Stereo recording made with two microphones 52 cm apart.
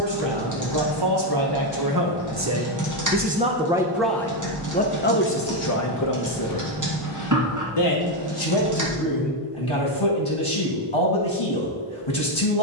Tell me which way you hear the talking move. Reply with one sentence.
In this clip you hear the talking go from the right side to the left.